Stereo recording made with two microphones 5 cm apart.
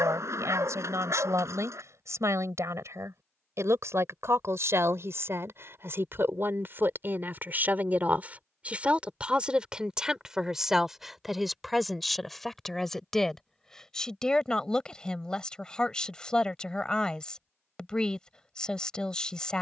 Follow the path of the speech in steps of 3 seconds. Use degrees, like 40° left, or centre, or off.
80° right, 60° right, 40° right, 10° right, 10° left, 20° left, 20° left.